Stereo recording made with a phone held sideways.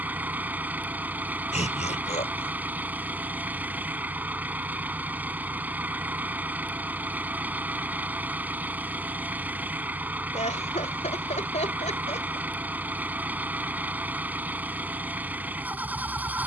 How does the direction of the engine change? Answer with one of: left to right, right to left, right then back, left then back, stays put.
stays put.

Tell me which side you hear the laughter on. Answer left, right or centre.
left.